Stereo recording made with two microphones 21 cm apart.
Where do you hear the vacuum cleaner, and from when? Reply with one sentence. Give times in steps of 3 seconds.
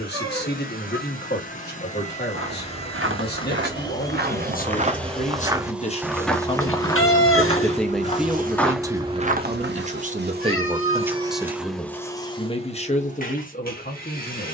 In this clip you hear the vacuum cleaner on the left from 0 s, in the centre from 3 s, on the right from 6 s and on the left from 12 s.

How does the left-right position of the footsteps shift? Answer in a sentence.
You can hear the footsteps go left and come back.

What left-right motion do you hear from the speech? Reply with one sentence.
In this clip you hear the speech move from left to right and back again.